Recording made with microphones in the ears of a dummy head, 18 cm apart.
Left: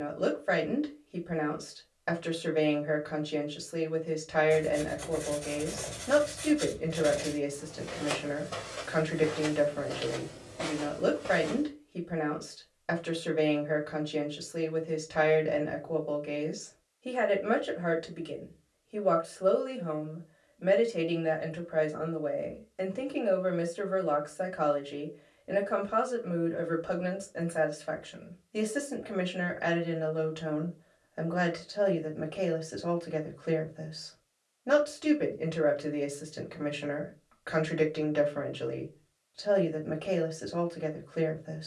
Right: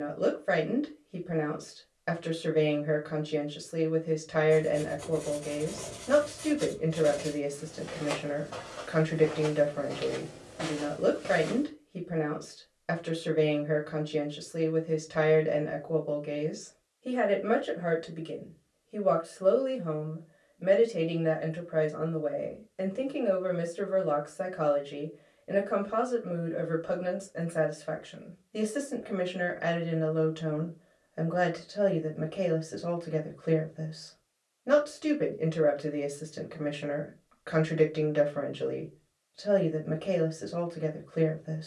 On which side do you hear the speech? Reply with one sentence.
You can hear the speech in the centre.